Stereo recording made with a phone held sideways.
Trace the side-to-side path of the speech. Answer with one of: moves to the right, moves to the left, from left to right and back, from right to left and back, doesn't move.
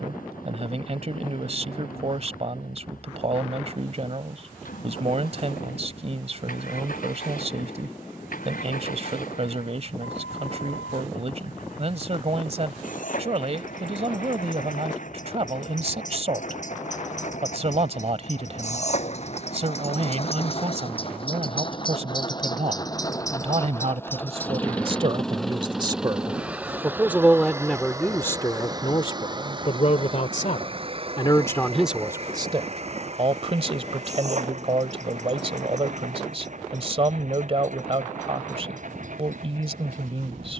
from right to left and back.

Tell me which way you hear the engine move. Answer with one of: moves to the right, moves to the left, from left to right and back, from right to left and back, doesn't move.
moves to the right.